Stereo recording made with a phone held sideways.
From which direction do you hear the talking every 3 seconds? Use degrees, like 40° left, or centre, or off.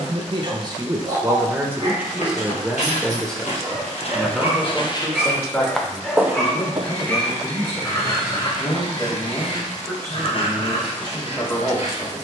20° right, 10° left, 30° left, 30° left.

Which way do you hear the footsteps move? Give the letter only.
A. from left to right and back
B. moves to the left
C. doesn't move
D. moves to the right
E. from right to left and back
D.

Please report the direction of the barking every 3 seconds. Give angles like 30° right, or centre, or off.
40° right, 10° right, 20° left, 50° left.